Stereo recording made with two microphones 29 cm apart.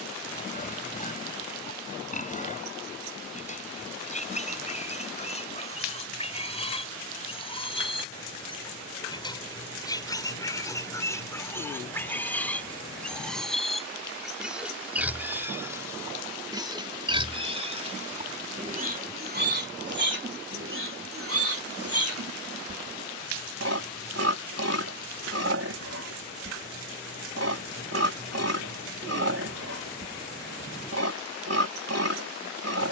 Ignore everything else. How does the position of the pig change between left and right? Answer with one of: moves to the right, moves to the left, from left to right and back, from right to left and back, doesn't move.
moves to the right.